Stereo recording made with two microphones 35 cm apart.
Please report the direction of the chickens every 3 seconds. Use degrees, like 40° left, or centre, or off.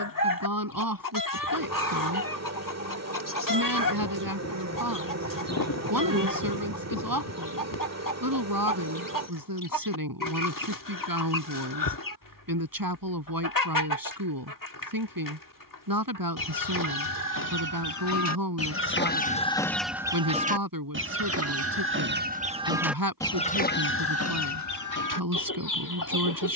70° left, 70° left, 70° left, 70° left, 70° left, 70° left, 10° left, 10° right, 60° left.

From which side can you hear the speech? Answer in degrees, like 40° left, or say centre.
80° right.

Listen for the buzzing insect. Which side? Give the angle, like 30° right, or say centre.
50° right.